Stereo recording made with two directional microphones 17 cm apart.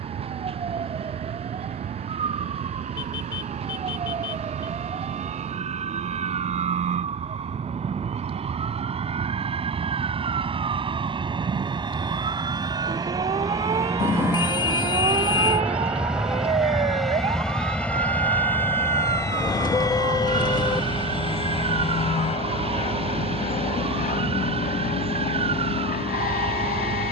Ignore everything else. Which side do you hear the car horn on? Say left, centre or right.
left.